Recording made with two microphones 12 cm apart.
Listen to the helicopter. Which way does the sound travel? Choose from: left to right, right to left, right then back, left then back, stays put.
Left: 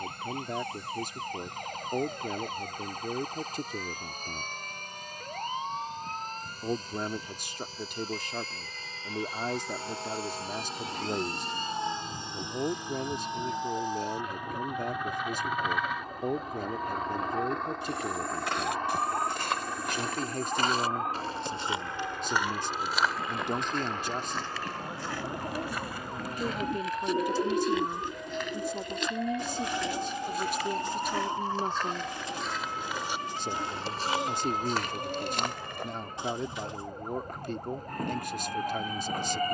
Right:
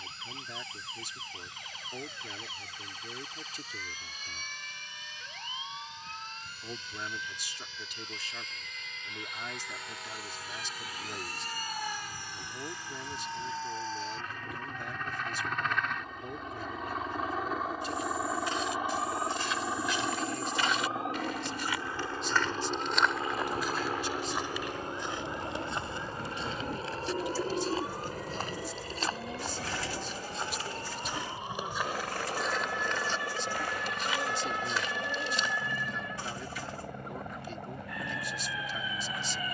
left to right.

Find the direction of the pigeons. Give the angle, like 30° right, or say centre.
20° left.